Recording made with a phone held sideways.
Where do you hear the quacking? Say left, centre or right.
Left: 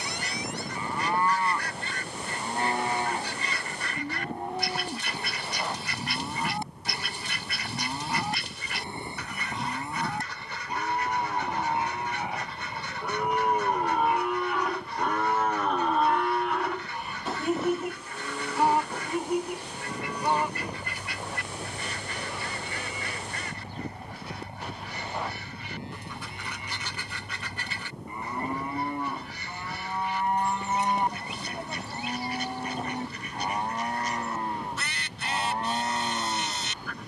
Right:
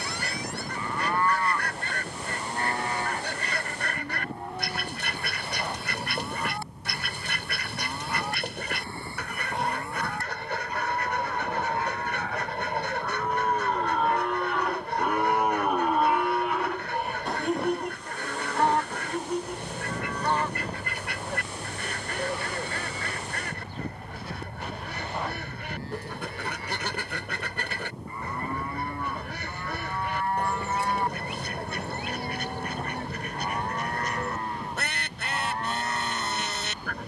right.